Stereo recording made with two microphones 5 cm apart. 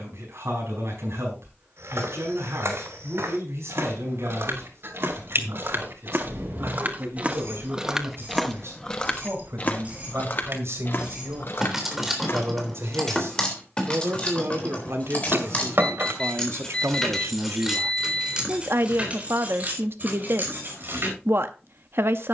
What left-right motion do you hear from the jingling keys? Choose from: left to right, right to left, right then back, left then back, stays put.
left then back.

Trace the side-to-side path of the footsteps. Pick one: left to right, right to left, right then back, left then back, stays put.
right to left.